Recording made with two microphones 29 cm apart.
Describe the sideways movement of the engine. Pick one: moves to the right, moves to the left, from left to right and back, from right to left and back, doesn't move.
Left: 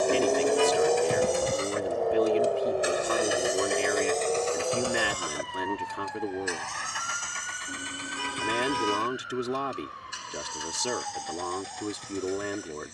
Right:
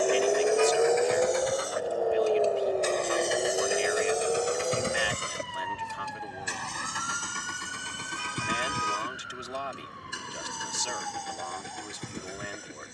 moves to the right.